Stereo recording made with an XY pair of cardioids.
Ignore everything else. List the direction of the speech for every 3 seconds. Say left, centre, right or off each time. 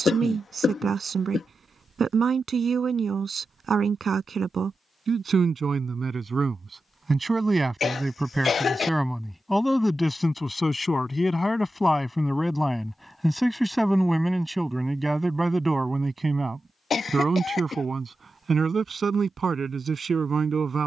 right, right, right, centre, centre, right, right.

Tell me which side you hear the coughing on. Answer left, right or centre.
left.